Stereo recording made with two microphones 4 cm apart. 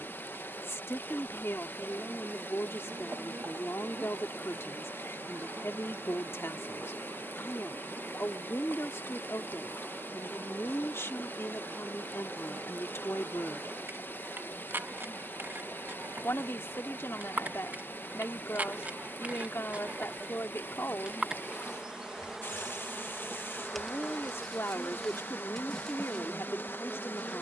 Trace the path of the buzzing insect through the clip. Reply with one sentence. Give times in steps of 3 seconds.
In this clip you hear the buzzing insect on the right from 0 s and in the centre from 21 s.